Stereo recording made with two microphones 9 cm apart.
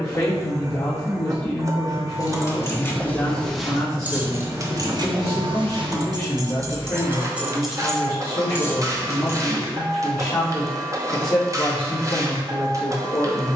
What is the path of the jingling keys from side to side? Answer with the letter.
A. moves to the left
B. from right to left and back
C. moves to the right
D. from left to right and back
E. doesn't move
D.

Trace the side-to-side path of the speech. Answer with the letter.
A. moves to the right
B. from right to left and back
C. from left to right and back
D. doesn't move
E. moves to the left
D.